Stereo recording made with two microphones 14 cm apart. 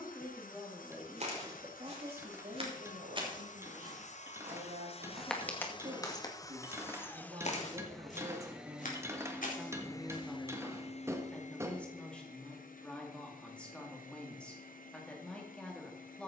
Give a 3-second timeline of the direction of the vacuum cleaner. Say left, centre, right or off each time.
left, left, centre, left, left, left.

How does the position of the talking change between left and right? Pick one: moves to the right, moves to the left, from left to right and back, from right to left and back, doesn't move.
from left to right and back.